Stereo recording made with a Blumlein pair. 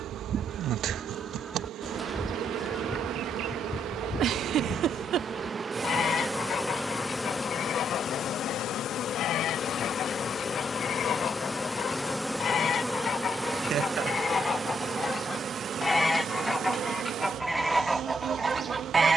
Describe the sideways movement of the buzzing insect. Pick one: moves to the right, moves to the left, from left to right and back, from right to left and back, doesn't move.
from right to left and back.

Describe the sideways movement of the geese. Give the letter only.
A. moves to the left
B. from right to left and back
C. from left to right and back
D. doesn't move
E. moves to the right
B.